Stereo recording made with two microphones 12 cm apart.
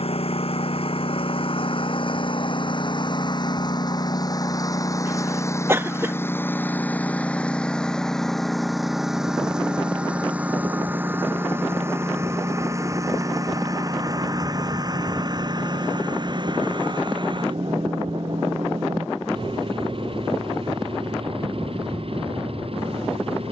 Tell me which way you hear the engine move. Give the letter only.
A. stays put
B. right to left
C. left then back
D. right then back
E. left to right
E.